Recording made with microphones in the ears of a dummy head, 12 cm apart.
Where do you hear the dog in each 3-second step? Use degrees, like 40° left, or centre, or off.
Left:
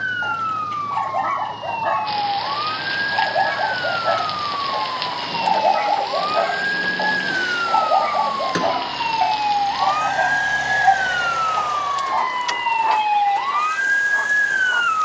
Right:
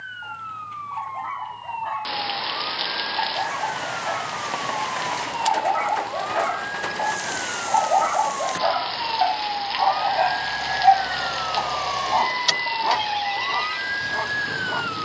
80° left, 60° left, 20° left, centre, 20° right.